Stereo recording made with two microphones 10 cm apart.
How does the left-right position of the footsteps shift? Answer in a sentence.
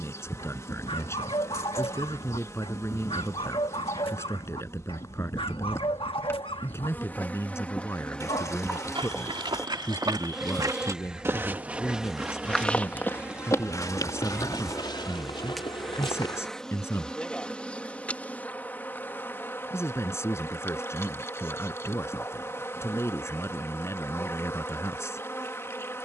In this clip you hear the footsteps move from right to left.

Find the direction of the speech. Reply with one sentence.
In this clip you hear the speech on the left.